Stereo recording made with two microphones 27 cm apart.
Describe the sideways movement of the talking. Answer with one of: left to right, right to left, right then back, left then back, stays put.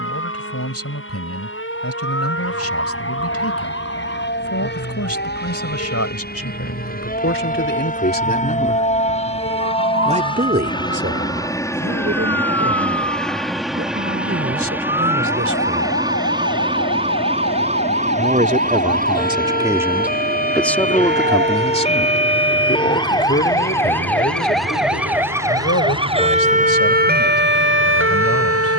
right then back.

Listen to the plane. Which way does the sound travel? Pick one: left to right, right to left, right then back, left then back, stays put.
left to right.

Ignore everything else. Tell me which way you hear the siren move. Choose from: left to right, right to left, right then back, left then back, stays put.
left to right.